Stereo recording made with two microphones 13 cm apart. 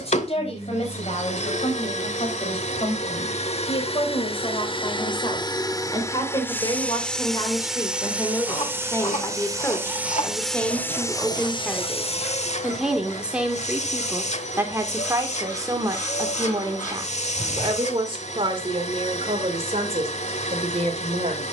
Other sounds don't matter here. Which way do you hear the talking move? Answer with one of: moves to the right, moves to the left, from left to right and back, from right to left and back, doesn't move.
moves to the right.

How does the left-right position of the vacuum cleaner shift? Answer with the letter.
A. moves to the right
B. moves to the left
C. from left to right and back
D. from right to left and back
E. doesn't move
C.